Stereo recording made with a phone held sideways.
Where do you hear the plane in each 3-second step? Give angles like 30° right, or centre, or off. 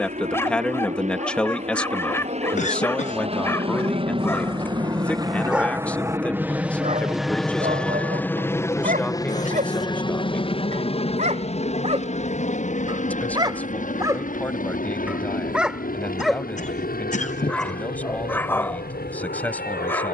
60° right, 30° right, centre, 30° left, 50° left, 60° left, 70° left.